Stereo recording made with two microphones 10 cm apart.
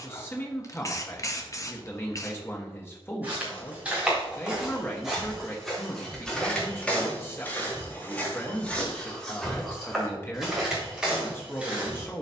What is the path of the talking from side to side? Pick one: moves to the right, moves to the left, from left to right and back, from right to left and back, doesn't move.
doesn't move.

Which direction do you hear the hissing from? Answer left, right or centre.
left.